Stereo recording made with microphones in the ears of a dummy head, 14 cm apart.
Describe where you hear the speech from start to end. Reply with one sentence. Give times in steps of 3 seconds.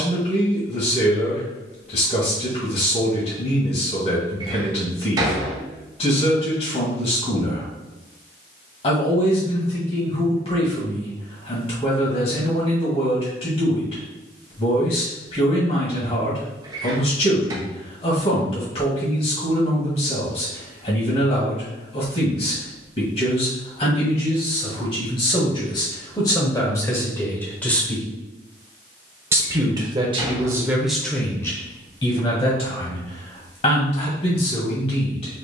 You can hear the speech on the left from 0 s, in the centre from 27 s and on the left from 33 s.